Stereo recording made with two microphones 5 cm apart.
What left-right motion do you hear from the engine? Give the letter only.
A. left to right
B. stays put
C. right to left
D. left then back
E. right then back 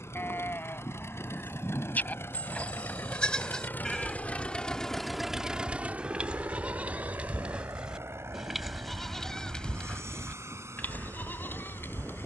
A.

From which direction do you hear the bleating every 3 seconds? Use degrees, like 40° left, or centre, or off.
40° left, 10° left, 20° right, 30° left.